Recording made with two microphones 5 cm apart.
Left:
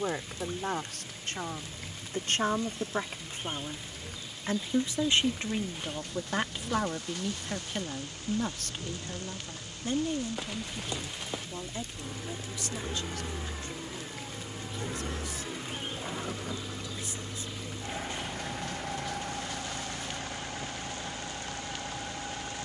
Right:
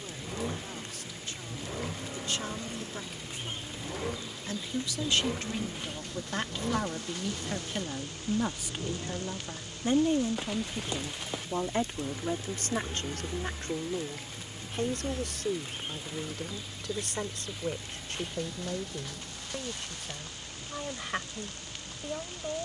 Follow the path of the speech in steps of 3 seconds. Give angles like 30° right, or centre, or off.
50° left, 30° left, centre, 30° right, 50° right, 60° right, 70° right, 70° right.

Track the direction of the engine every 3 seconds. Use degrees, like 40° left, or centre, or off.
60° right, 50° right, 30° right, 10° right, 20° left, 40° left, 50° left, 60° left.